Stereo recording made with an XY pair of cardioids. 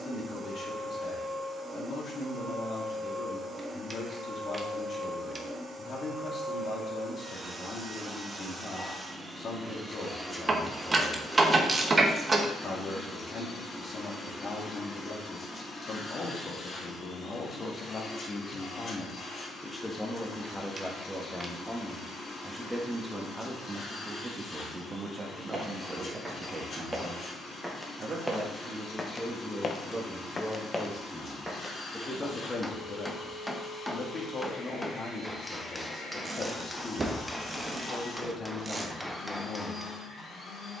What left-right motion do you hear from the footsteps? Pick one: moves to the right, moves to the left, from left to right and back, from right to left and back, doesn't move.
from right to left and back.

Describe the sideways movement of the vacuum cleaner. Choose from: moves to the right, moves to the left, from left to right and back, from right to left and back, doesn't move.
moves to the left.